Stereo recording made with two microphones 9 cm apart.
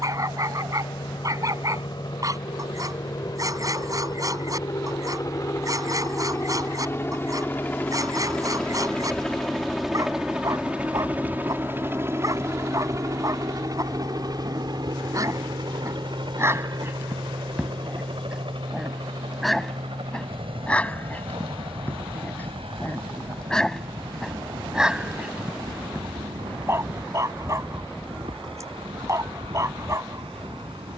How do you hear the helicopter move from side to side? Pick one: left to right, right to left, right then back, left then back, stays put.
left to right.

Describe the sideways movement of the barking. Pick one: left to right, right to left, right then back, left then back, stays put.
left then back.